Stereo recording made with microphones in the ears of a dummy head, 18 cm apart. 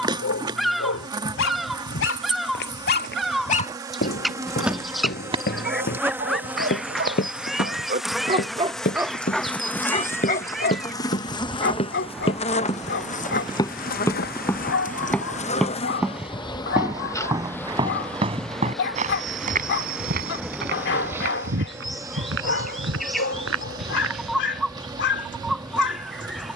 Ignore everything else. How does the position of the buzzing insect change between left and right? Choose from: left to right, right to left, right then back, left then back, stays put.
left then back.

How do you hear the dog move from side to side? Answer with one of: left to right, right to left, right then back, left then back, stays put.
right then back.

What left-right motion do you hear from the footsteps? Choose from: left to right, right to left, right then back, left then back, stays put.
left to right.